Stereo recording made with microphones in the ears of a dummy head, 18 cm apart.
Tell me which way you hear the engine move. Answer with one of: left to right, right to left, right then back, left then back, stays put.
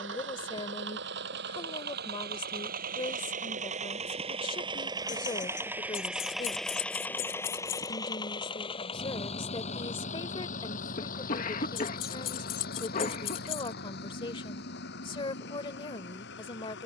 right to left.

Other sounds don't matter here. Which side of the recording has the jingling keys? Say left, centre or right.
left.